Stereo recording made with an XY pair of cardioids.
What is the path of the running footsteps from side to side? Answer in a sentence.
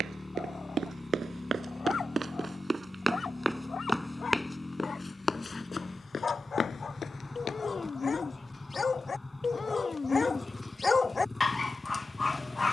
You can hear the running footsteps go from the right side to the left.